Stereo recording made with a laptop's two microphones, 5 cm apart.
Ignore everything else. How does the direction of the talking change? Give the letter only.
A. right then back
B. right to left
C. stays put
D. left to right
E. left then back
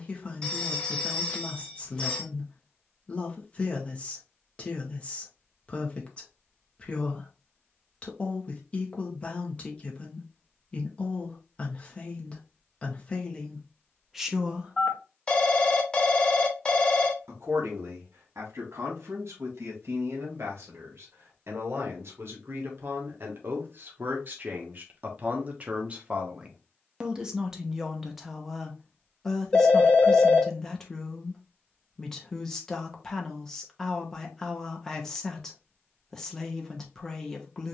A.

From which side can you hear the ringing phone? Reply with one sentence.
You can hear the ringing phone on the left.